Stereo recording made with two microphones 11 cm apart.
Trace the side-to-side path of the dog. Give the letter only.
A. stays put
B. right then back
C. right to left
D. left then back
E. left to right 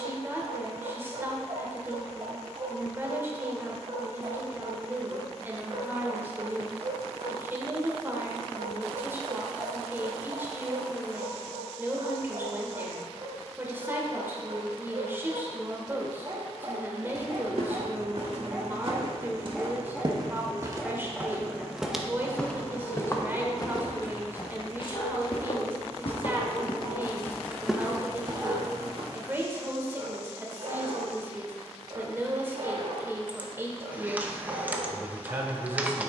D.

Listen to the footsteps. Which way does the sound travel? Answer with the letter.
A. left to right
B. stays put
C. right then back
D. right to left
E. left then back
E.